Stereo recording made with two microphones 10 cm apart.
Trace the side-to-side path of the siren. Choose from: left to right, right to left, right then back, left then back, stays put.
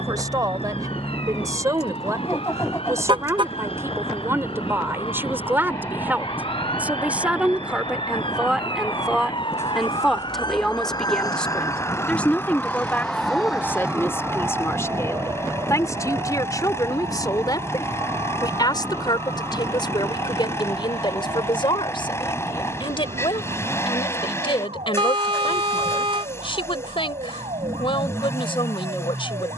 left to right.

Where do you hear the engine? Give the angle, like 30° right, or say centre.
30° left.